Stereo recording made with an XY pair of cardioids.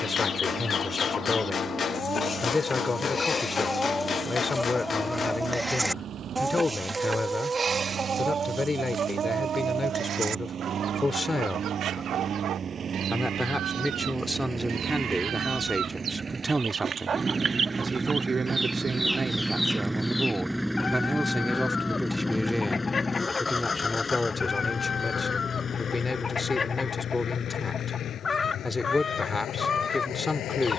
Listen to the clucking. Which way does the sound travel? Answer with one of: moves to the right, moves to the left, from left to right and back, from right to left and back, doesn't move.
from left to right and back.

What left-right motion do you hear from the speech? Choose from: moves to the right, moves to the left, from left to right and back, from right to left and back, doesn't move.
from left to right and back.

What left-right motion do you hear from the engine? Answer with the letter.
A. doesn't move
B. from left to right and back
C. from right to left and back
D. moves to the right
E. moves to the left
E.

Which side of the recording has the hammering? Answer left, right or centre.
left.